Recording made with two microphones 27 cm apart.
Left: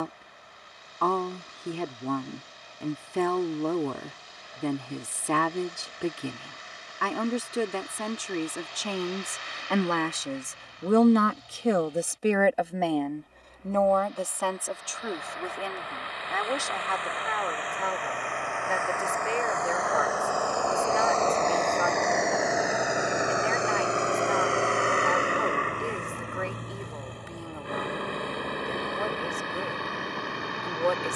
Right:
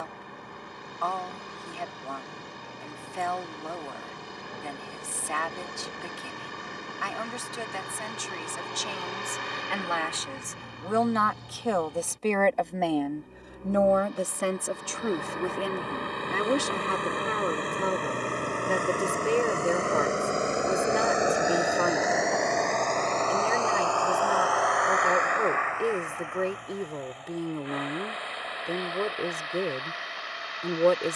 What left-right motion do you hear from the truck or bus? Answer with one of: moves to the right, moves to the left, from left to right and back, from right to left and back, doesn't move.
moves to the left.